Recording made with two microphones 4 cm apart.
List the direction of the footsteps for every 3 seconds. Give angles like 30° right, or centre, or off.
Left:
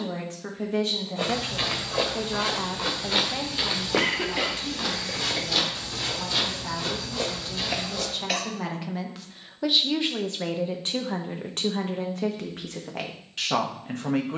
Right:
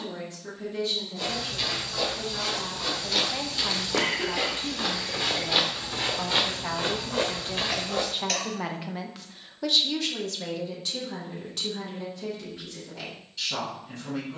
40° left, centre, 50° right, off, off.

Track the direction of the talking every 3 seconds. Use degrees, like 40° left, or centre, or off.
60° left, 30° right, 30° right, 30° left, 60° left.